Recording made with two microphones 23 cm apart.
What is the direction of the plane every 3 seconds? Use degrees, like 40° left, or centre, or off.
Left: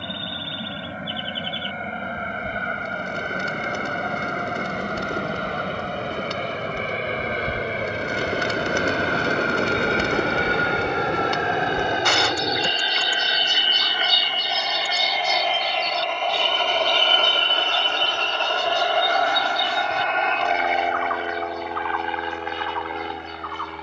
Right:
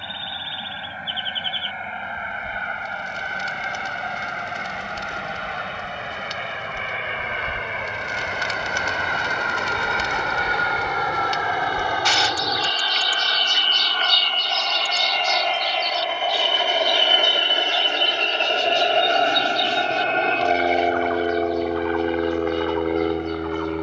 50° left, 50° left, 40° left, 30° left, 10° left, 10° right, 30° right, 40° right.